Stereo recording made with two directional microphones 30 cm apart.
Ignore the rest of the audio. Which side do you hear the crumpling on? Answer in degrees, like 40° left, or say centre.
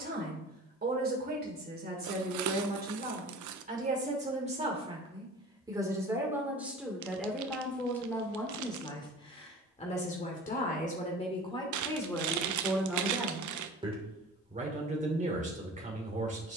70° right.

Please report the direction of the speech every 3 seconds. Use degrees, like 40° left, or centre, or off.
30° right, 20° right, centre, 20° left, 10° right, 20° right.